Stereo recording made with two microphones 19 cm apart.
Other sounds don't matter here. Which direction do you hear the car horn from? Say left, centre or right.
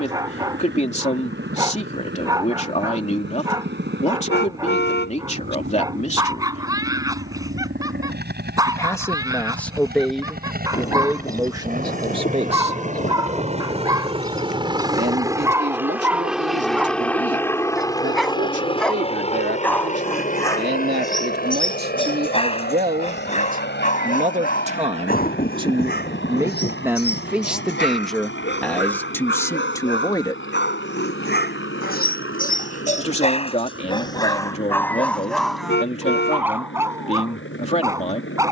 left.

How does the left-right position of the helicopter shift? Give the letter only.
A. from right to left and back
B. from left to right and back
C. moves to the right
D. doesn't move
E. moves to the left
E.